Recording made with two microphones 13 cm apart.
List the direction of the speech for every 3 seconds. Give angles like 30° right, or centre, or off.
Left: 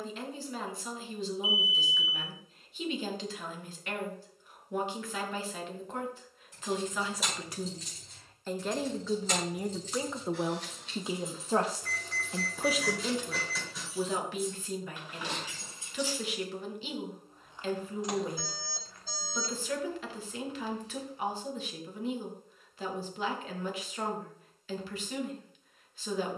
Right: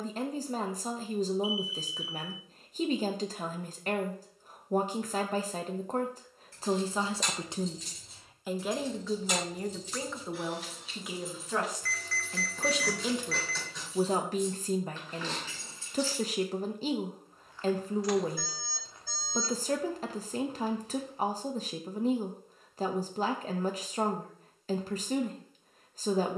40° right, 40° right, 20° right, 20° left, 20° right, 40° right, 40° right, 40° right, 40° right.